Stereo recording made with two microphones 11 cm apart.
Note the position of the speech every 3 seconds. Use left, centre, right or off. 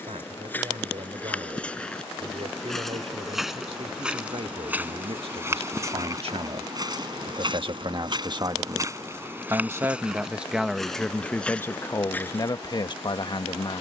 right, right, right, centre, left.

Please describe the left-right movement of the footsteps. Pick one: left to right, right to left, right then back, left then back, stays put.
right then back.